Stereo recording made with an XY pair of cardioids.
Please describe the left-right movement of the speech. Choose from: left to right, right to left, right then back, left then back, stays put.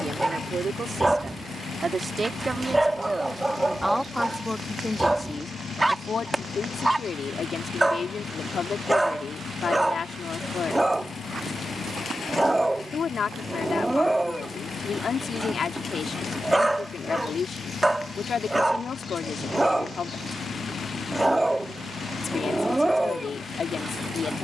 right to left.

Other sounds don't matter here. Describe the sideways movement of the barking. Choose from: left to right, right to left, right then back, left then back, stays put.
stays put.